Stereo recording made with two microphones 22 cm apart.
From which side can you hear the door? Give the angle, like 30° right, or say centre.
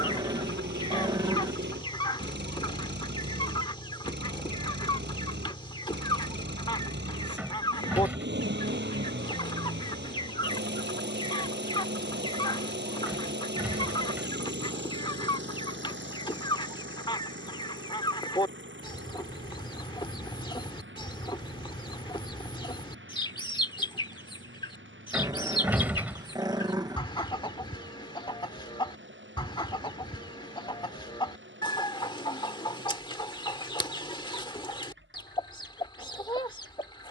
10° right.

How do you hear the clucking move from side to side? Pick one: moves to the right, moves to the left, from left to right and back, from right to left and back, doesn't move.
doesn't move.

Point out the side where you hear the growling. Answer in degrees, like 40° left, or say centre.
20° right.